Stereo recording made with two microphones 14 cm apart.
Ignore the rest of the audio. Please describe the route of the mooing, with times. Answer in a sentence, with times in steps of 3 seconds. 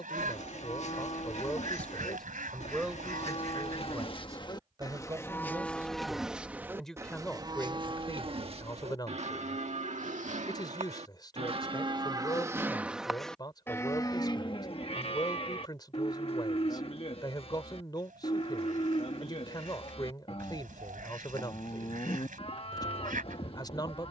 In this clip you hear the mooing on the left from 0 s, on the right from 6 s, in the centre from 12 s and on the left from 15 s.